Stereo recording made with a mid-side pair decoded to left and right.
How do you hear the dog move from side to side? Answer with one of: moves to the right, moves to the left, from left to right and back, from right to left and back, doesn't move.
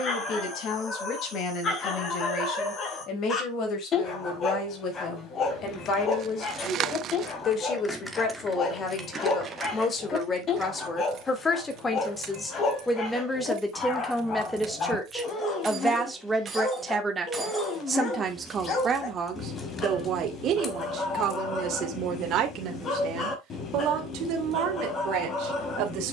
doesn't move.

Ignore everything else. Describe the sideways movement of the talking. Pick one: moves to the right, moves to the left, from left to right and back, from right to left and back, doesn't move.
moves to the right.